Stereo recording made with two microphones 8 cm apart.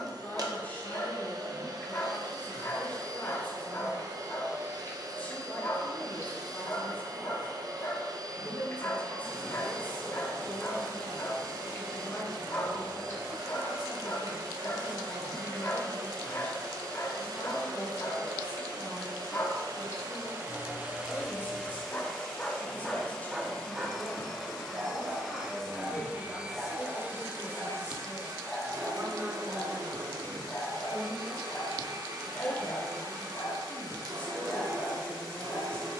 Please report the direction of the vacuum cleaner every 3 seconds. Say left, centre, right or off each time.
right, right, right, right, right, right, right, centre, centre, right, right, right.